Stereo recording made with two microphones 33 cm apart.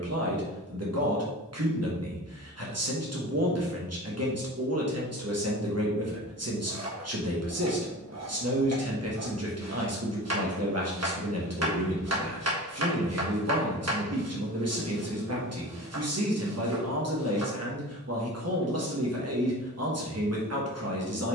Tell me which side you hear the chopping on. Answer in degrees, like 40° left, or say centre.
50° right.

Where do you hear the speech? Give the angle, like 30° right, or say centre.
50° right.